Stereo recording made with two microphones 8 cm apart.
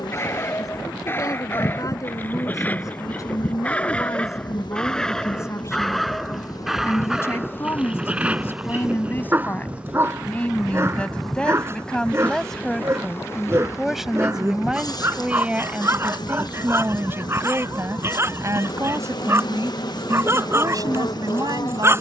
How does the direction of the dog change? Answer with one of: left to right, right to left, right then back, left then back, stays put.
left to right.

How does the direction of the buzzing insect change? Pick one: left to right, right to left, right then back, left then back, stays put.
right then back.